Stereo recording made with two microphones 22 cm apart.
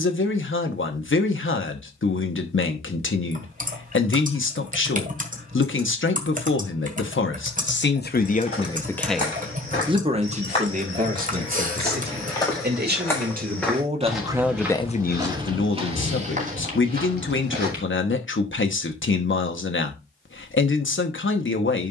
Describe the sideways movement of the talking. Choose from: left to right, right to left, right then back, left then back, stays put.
right then back.